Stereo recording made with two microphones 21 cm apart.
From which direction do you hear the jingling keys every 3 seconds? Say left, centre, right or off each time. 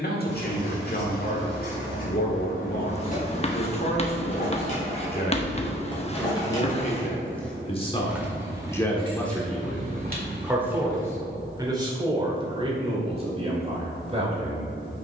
left, left, centre, right, off.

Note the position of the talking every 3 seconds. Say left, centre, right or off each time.
left, left, left, centre, right.